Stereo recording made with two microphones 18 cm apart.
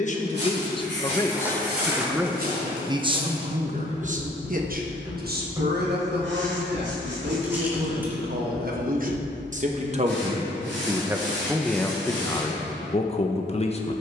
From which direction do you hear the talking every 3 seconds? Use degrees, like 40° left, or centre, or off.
10° left, 40° right, 60° right, 20° right, 30° left.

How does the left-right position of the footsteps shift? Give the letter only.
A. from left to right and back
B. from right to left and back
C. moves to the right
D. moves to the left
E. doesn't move
D.